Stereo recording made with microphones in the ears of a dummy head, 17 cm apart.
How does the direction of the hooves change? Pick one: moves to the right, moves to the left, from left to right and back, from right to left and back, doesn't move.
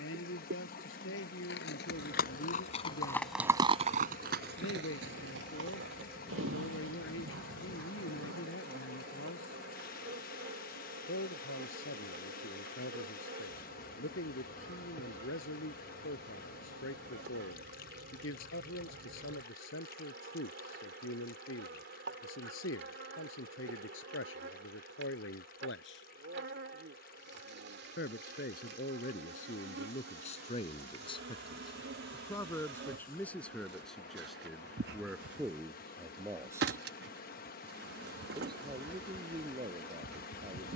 moves to the right.